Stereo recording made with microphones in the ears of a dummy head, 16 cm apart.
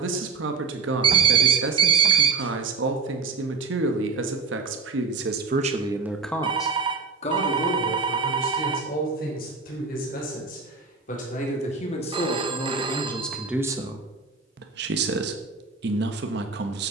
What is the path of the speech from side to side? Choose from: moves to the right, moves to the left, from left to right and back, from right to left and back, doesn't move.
from right to left and back.